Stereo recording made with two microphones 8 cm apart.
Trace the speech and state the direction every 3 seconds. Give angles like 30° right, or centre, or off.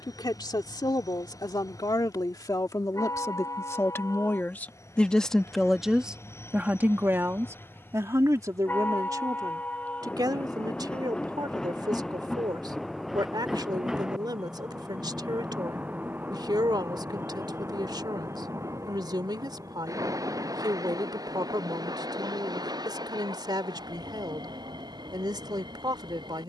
60° left, 20° left, 30° right, 60° right, 60° right, 60° right, 60° right, 60° right, 60° right.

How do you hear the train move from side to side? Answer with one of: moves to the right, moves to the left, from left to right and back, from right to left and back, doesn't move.
moves to the right.